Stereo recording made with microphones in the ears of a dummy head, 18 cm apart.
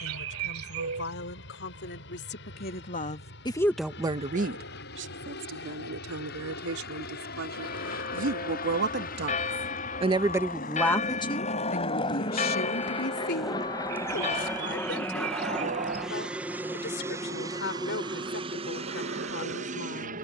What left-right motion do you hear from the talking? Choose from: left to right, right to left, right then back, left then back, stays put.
right then back.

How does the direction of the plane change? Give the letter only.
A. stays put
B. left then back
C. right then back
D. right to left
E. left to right
E.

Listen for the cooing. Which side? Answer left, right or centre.
right.